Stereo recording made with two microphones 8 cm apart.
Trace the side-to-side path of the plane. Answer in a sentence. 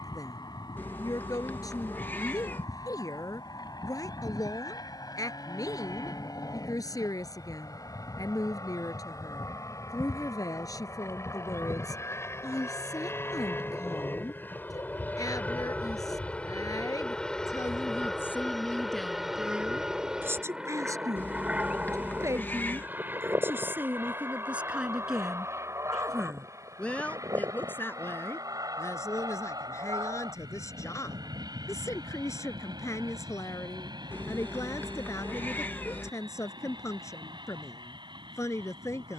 You can hear the plane move to the right.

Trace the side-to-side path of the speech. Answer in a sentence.
You can hear the speech go right and come back.